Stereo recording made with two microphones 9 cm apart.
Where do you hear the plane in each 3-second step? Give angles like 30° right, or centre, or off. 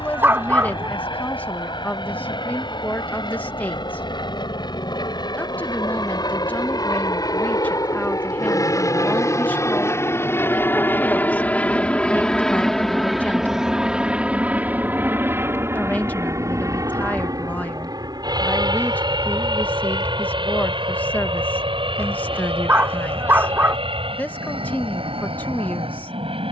60° left, 60° left, 40° left, 20° left, 10° right, 30° right, 50° right, 60° right, 70° right.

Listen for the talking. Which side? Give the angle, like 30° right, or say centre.
20° left.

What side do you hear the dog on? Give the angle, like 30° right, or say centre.
20° right.